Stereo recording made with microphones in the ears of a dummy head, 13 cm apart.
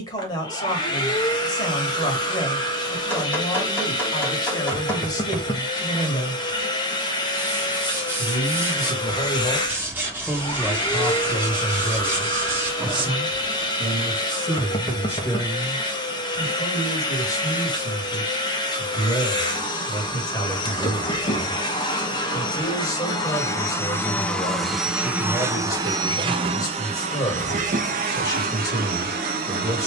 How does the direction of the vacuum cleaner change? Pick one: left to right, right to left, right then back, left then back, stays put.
left to right.